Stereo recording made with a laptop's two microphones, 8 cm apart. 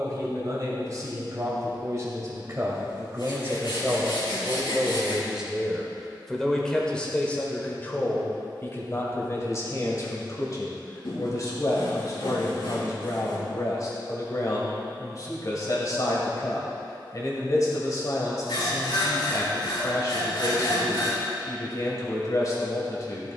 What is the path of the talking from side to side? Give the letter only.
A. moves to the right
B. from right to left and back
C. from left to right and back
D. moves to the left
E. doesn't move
D.